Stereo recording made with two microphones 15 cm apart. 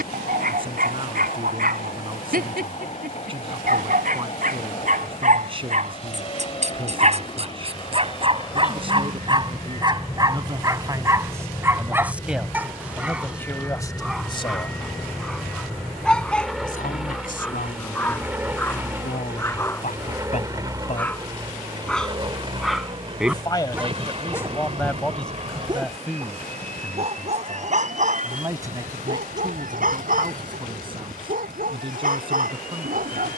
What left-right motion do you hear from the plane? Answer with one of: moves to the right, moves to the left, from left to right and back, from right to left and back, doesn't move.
moves to the right.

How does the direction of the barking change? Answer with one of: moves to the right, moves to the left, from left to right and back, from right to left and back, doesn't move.
from right to left and back.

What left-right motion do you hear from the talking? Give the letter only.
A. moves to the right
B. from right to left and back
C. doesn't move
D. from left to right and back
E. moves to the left
B.